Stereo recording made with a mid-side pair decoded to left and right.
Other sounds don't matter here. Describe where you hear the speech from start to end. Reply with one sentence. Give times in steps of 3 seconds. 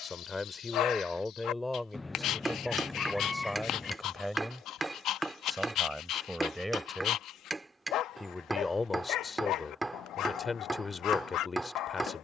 You can hear the speech in the centre from 0 s and on the left from 9 s.